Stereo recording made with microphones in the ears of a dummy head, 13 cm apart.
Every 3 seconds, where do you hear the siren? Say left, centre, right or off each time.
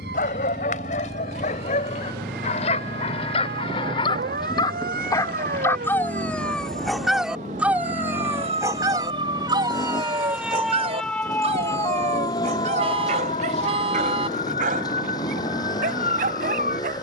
right, right, right, centre, left, left.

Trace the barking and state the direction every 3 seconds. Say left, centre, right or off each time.
left, left, centre, right, right, right.